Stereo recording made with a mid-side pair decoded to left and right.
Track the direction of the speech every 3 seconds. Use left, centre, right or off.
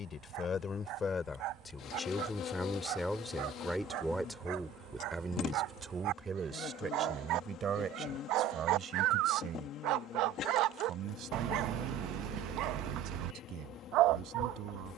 left, centre, right, right, right.